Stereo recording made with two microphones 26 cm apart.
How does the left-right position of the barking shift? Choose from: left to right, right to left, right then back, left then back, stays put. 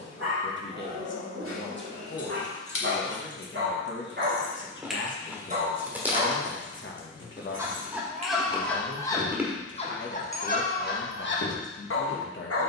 right to left.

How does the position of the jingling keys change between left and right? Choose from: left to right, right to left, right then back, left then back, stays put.
right then back.